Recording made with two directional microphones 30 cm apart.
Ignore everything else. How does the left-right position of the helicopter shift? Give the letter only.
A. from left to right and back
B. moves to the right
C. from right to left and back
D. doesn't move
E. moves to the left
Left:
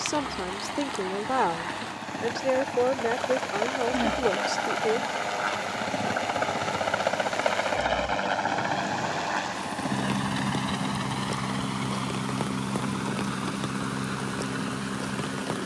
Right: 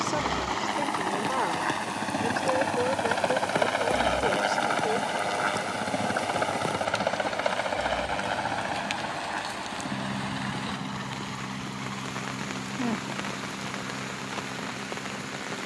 E.